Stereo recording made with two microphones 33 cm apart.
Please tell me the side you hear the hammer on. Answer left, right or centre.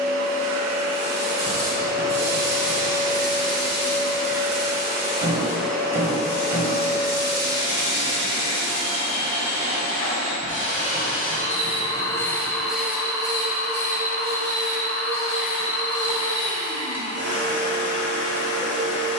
centre.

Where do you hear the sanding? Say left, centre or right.
left.